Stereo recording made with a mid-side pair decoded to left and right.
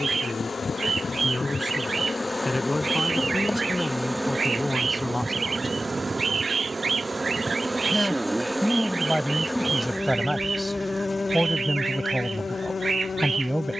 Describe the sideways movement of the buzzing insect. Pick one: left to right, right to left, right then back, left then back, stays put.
right then back.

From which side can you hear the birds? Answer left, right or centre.
right.